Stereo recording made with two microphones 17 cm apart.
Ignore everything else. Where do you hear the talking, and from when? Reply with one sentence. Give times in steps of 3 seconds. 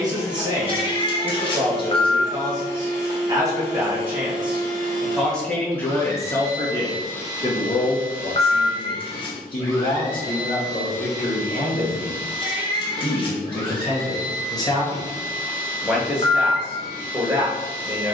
In this clip you hear the talking on the right from 0 s, in the centre from 3 s, on the left from 6 s and in the centre from 15 s.